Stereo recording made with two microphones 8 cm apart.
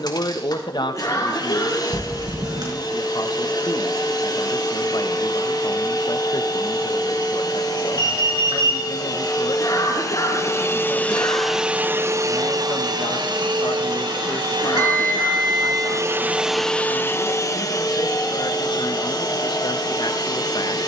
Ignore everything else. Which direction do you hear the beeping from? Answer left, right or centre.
right.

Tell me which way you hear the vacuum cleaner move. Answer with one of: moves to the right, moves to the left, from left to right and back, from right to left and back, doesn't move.
from left to right and back.